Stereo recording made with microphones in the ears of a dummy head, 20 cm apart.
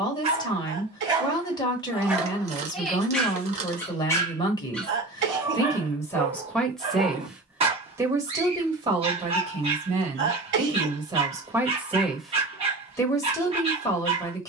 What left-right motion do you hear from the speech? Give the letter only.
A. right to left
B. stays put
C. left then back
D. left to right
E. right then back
E.